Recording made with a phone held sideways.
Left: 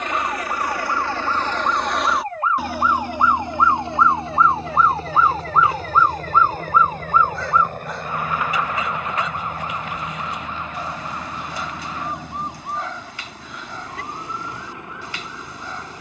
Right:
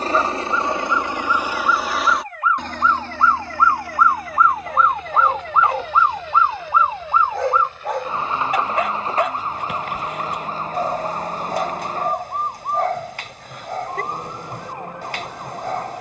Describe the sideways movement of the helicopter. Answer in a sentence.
In this clip you hear the helicopter travel towards the left.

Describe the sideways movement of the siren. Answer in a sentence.
You can hear the siren move to the right.